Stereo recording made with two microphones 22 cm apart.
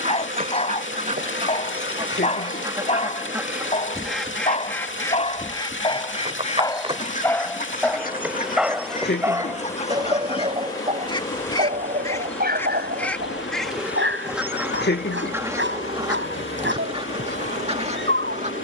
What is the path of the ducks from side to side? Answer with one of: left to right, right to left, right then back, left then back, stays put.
left then back.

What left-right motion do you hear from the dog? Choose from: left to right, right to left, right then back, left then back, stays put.
left to right.